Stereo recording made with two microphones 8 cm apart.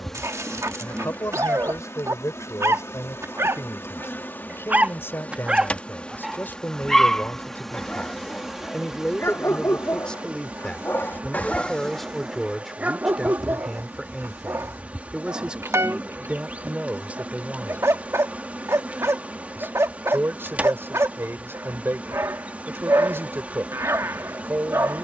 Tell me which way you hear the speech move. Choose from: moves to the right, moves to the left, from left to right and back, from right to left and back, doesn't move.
moves to the right.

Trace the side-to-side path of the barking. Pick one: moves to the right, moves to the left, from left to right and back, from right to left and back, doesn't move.
from right to left and back.